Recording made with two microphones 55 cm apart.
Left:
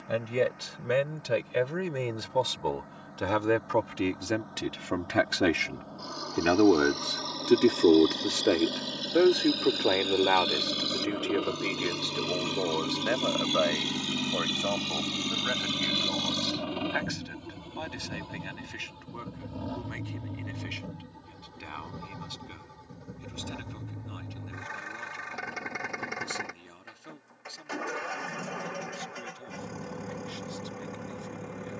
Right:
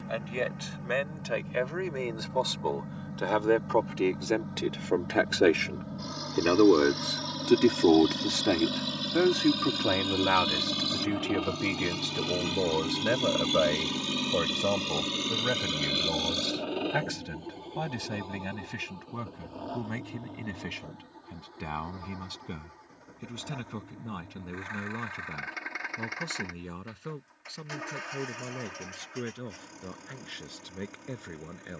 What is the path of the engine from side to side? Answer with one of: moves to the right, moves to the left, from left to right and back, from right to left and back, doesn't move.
moves to the left.